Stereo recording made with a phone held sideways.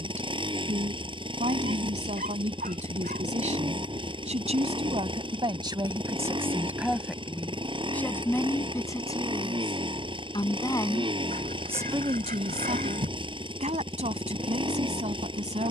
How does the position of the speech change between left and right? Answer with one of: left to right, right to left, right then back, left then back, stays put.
left then back.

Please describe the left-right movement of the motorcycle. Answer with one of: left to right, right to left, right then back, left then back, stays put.
stays put.